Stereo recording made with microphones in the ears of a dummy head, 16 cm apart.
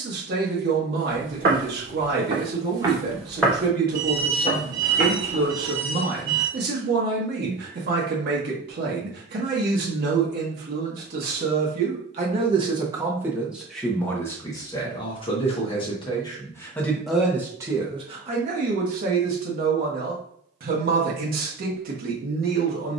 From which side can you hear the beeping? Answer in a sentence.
In this clip you hear the beeping on the right.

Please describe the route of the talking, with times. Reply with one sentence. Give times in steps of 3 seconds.
You can hear the talking on the right from 0 s, in the centre from 12 s and on the right from 18 s.